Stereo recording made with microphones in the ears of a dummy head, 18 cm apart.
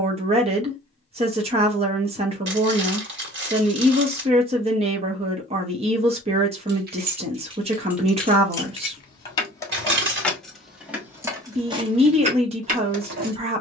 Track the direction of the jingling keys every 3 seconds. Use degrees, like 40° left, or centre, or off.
off, off, 10° right, centre, 40° right.